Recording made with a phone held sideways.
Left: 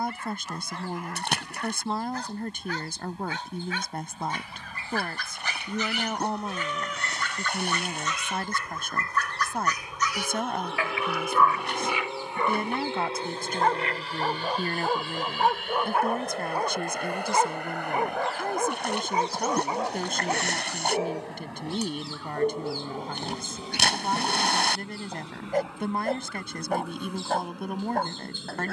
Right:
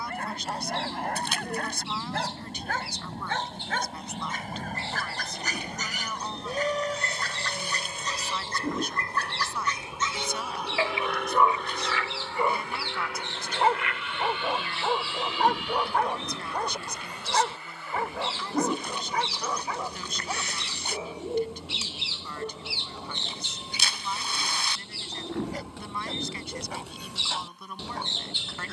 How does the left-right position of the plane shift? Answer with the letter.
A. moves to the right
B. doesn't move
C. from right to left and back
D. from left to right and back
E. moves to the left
E.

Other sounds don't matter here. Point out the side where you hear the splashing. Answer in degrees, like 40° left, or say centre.
70° left.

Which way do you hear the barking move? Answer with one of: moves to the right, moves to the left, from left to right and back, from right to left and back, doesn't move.
moves to the left.